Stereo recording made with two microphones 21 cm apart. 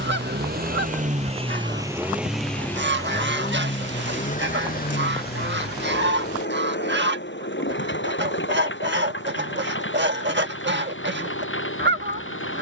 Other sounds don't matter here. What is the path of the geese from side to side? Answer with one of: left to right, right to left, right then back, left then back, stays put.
stays put.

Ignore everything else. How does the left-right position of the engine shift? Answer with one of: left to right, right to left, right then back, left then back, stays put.
right to left.